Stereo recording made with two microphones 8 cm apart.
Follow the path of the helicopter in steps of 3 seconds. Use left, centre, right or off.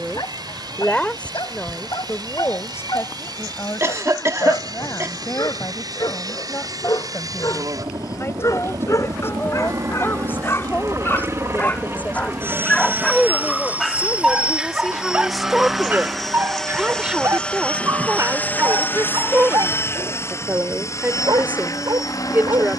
right, right, right, right, right, centre, left, left.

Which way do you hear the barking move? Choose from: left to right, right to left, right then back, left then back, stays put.
left to right.